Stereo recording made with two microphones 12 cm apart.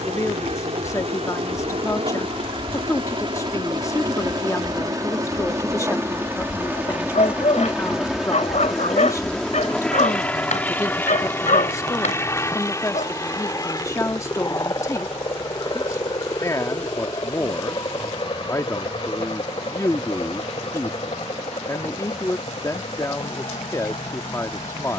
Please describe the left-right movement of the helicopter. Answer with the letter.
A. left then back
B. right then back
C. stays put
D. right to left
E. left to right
D.